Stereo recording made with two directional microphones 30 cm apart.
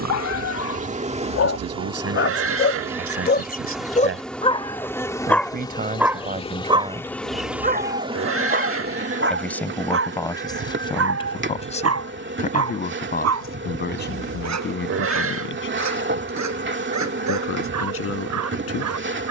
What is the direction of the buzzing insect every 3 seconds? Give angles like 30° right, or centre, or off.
20° right, centre, centre, 40° right, 40° right, 40° right, 40° right.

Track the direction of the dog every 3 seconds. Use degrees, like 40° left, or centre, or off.
50° left, 20° left, 20° right, 50° right, 60° right, 70° right, 70° right.